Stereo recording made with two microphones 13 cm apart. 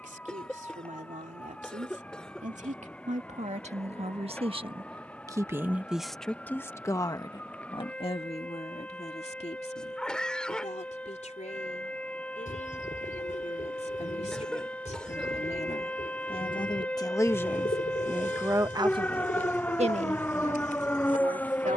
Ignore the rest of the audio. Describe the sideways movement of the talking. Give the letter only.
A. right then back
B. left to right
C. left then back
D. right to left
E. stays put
C.